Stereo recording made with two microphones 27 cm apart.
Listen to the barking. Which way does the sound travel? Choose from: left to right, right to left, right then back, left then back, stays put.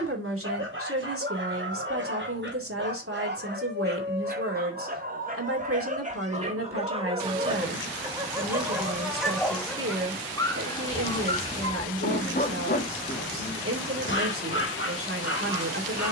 right to left.